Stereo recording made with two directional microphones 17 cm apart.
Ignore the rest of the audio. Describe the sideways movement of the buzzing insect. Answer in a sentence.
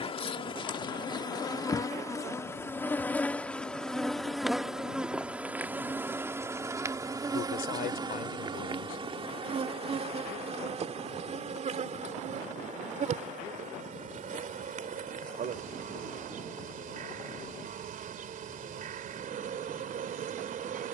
You can hear the buzzing insect travel towards the right.